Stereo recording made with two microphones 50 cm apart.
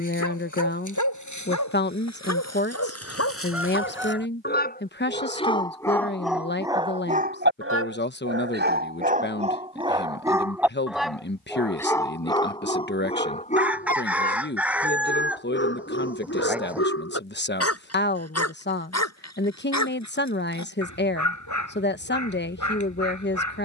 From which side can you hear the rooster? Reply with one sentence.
In this clip you hear the rooster in the centre.